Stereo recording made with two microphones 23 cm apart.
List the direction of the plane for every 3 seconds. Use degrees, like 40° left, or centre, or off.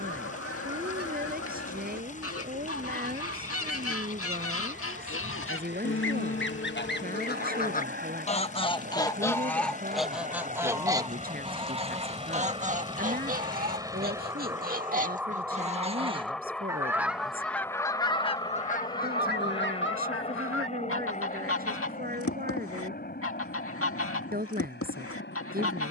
60° right, 60° right, 50° right, 30° right, 20° right, centre, 20° left, 40° left, 40° left.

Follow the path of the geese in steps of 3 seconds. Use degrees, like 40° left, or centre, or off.
70° left, 70° left, 40° left, 10° right, 40° right, 10° right, 50° left, 70° left, 70° left.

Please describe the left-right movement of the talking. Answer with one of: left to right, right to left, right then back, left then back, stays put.
stays put.